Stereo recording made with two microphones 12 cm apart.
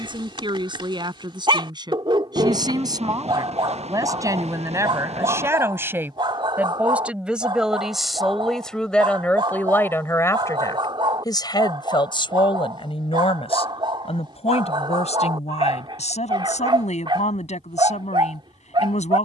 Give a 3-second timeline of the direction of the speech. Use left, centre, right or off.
right, right, centre, left, left, left, left.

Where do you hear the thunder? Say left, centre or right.
right.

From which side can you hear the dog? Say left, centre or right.
right.